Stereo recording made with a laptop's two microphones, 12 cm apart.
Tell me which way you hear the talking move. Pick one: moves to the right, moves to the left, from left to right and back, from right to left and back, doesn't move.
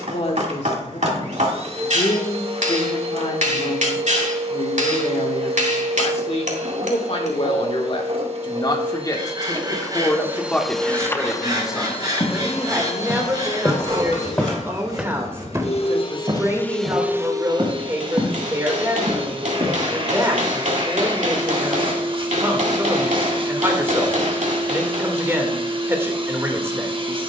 moves to the right.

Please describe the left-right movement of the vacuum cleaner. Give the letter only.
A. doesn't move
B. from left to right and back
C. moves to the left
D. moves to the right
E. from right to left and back
E.